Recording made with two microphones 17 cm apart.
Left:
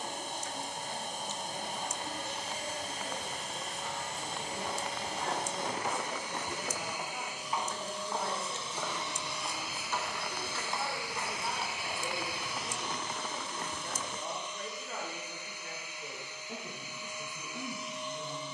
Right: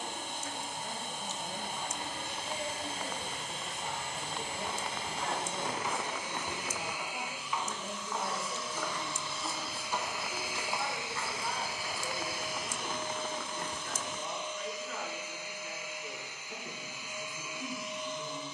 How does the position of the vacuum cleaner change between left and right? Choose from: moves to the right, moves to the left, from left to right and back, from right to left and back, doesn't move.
moves to the right.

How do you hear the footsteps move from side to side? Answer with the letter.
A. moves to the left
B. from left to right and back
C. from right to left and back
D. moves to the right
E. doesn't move
B.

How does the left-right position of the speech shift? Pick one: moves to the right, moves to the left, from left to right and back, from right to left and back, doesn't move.
moves to the left.